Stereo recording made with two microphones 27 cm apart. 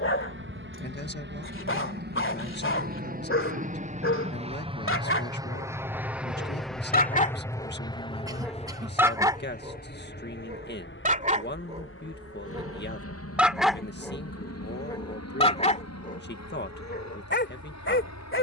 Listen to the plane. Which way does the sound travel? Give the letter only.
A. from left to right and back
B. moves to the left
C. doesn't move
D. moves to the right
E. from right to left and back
B.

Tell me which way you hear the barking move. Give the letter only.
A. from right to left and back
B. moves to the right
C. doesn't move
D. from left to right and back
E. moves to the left
D.